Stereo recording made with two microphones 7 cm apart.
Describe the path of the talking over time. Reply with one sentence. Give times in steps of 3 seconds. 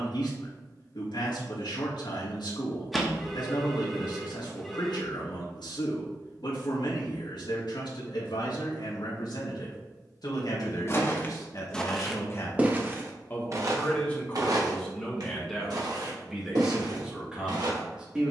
You can hear the talking on the left from 0 s and in the centre from 15 s.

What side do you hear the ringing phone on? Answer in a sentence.
You can hear the ringing phone in the centre.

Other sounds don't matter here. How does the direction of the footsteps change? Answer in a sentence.
You can hear the footsteps travel towards the right.